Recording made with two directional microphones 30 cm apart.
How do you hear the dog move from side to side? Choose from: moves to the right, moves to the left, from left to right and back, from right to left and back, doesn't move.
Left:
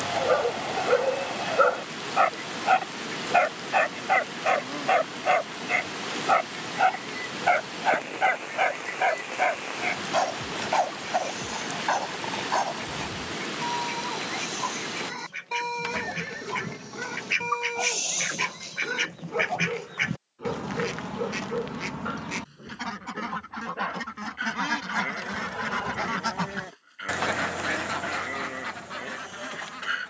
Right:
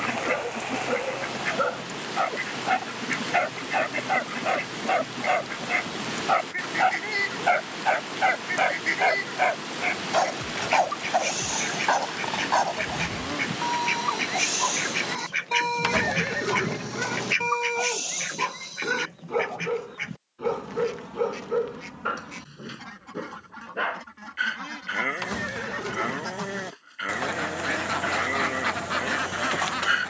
moves to the right.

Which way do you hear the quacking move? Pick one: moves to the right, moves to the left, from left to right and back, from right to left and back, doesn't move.
from right to left and back.